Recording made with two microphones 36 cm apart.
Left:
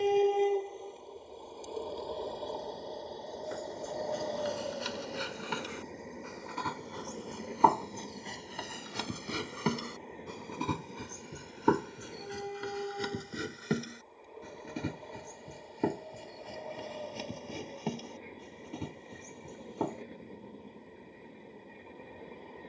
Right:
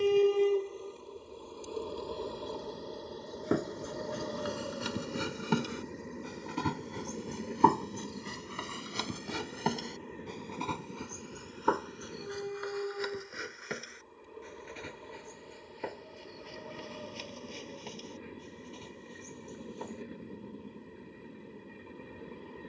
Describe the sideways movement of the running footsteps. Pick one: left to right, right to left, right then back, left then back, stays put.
right to left.